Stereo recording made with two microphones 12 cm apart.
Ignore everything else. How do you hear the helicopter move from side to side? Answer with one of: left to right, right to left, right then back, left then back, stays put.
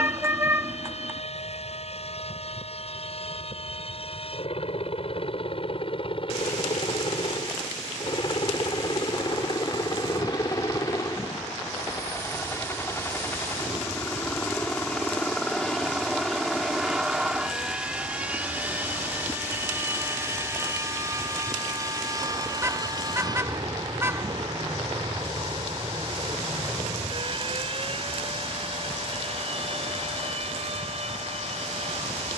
left to right.